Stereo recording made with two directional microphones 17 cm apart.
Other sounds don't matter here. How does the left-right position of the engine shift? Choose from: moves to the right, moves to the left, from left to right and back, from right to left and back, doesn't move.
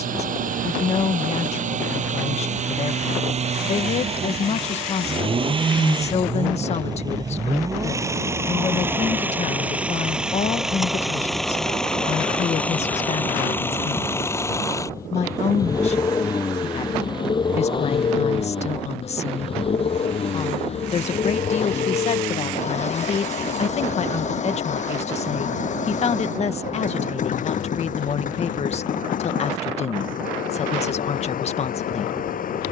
moves to the left.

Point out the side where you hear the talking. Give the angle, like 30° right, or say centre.
40° left.